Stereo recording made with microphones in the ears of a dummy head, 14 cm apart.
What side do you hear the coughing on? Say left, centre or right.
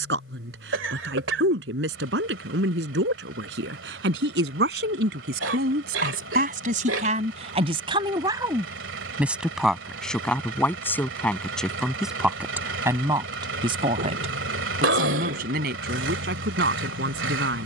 right.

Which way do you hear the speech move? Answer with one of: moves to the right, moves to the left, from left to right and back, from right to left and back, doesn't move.
from right to left and back.